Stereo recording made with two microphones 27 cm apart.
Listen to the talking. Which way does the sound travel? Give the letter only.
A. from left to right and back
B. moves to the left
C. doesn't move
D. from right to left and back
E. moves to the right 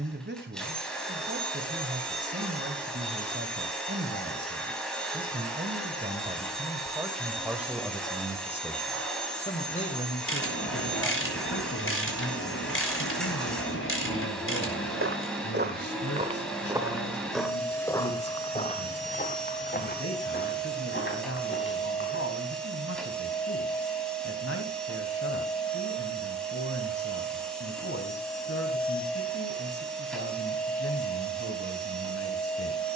B.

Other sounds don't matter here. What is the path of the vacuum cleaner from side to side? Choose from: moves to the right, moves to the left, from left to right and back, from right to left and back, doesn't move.
doesn't move.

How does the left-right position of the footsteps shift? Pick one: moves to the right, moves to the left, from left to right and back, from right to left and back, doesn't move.
moves to the left.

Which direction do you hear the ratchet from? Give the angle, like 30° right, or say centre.
50° left.